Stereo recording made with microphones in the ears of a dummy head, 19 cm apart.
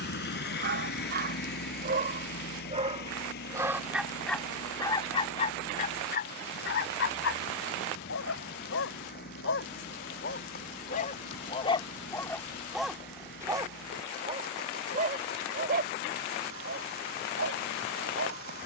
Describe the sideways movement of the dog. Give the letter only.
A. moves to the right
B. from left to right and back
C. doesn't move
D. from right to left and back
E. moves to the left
D.